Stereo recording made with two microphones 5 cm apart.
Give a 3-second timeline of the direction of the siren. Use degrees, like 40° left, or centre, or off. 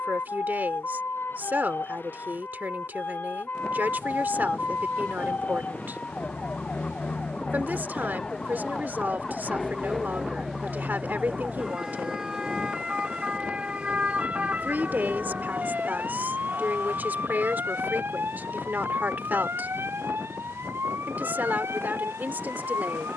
50° left, 40° left, 20° left, centre, 20° right, 40° right, 50° right, 60° right.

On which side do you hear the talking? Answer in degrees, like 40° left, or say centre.
40° right.